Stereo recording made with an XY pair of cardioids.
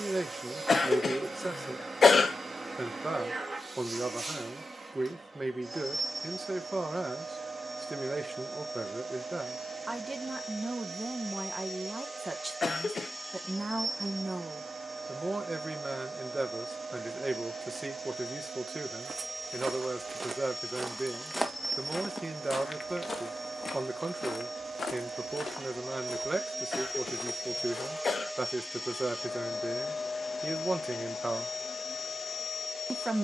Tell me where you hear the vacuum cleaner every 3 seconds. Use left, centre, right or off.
right, right, right, right, right, right, right, right, right, centre, left.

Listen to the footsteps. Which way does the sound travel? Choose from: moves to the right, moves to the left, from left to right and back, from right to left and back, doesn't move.
moves to the left.